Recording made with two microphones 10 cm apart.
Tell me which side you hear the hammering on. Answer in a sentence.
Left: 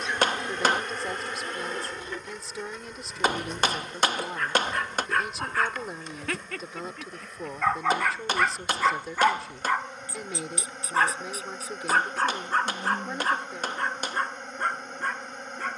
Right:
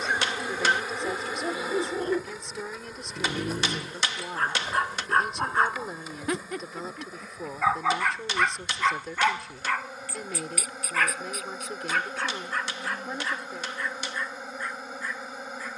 In this clip you hear the hammering on the left.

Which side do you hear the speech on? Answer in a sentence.
In this clip you hear the speech in the centre.